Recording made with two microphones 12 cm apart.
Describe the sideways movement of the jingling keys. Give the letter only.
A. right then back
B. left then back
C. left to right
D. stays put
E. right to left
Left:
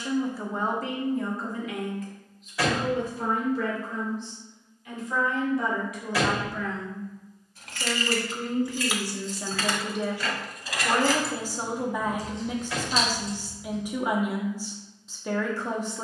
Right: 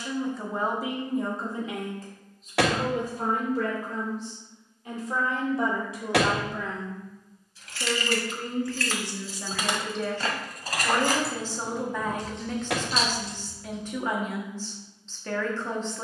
C.